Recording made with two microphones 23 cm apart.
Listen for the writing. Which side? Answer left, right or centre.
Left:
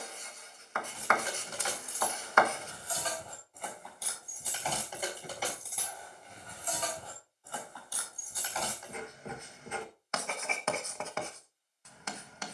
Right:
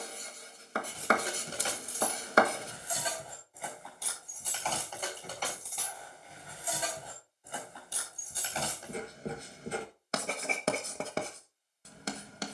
right.